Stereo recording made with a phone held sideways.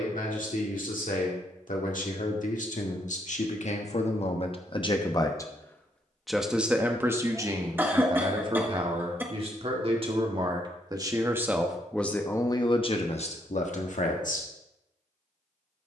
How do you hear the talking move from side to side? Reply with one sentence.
You can hear the talking move from left to right and back again.